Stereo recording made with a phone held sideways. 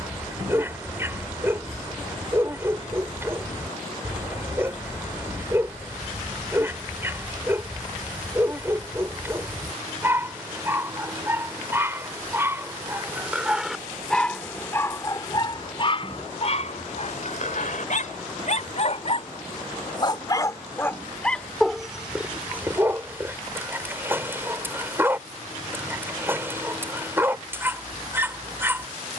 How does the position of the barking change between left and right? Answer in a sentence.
You can hear the barking go left and come back.